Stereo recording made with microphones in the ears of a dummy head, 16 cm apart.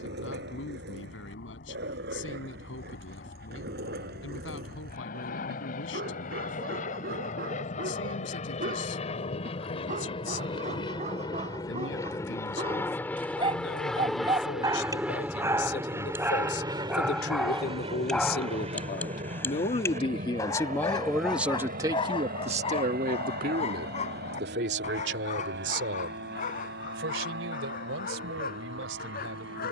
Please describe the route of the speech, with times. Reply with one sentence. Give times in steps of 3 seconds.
You can hear the speech on the left from 0 s and on the right from 21 s.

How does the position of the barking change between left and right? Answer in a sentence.
In this clip you hear the barking go from the right side to the left.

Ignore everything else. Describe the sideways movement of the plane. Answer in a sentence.
In this clip you hear the plane go from the left side to the right.